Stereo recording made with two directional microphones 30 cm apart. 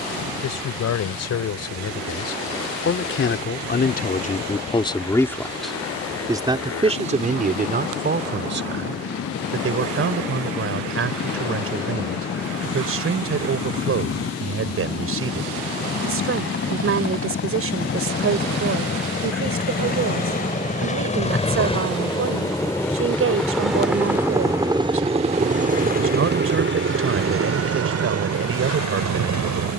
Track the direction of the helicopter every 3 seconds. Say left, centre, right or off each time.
left, left, left, left, left, left, left, centre, right, right.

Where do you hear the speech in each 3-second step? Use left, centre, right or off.
left, left, right, right, right, right, right, right, right, right.